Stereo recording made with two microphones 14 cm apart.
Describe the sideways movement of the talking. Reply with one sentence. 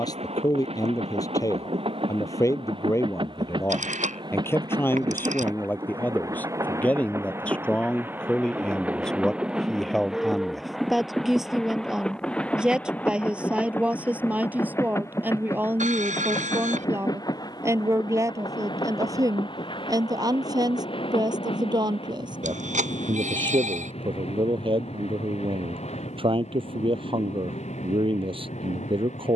In this clip you hear the talking travel towards the right.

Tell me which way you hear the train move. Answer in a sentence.
In this clip you hear the train travel towards the left.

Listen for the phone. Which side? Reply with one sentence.
In this clip you hear the phone on the right.